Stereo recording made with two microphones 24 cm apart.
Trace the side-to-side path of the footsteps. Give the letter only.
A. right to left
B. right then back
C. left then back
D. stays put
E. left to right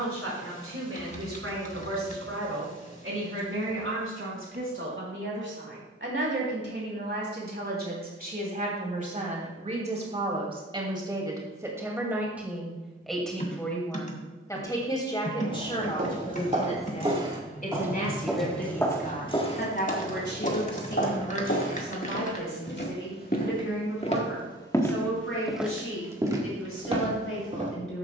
C.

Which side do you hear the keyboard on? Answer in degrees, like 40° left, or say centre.
30° left.